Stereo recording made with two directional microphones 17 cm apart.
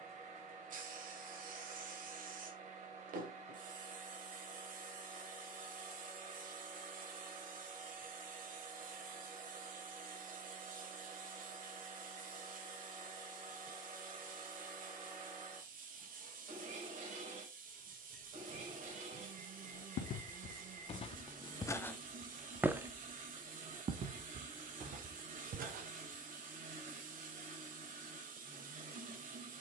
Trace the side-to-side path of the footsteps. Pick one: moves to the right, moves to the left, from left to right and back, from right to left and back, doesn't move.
moves to the right.